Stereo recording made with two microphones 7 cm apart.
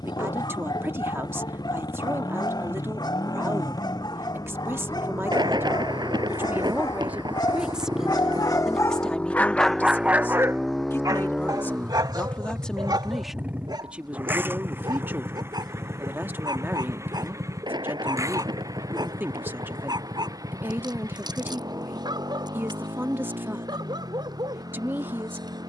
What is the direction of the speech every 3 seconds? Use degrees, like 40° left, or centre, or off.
30° right, 30° right, 20° right, 20° left, 10° right, 30° right, 30° right, 30° right, 30° right.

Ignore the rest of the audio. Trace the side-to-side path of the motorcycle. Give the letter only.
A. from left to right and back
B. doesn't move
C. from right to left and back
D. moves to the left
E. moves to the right
E.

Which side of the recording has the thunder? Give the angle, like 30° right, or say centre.
70° right.